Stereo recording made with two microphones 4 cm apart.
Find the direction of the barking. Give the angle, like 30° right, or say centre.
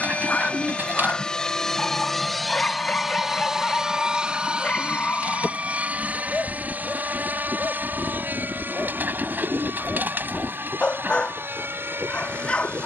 30° left.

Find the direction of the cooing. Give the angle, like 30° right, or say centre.
50° right.